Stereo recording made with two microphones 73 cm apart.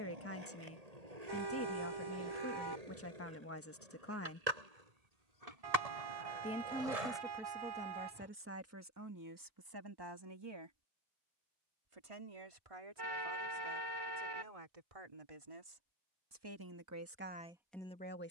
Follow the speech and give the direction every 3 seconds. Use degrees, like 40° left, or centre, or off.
20° left, 20° left, 10° right, 30° right, 50° right, 30° right.